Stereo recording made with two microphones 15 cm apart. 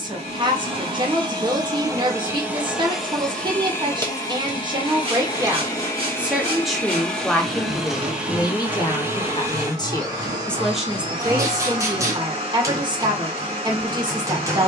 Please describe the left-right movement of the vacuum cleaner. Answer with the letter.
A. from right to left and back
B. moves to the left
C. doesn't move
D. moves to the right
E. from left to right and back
A.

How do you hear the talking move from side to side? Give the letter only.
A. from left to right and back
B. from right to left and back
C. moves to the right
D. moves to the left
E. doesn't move
B.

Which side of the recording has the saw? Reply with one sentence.
You can hear the saw on the right.